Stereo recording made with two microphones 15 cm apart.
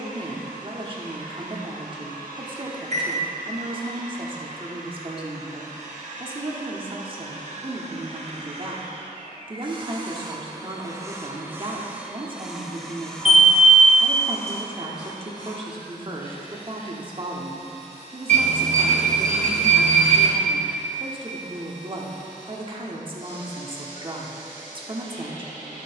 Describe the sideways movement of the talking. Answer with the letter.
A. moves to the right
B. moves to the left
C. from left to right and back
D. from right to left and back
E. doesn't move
E.